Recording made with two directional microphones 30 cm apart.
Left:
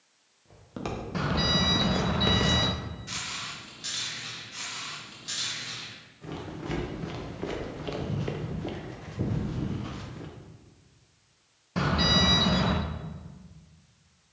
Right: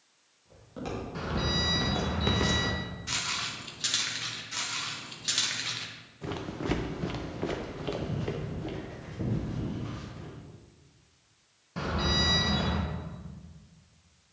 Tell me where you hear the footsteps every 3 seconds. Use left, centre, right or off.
left, right, centre, left, off.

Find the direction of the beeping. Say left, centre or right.
left.